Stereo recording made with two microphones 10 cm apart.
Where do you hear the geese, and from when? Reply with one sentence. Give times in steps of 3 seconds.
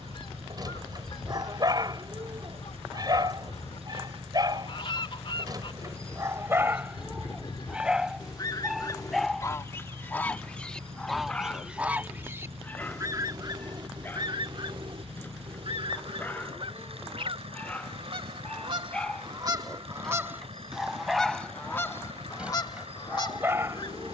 You can hear the geese on the left from 0 s, in the centre from 9 s, on the right from 12 s and on the left from 21 s.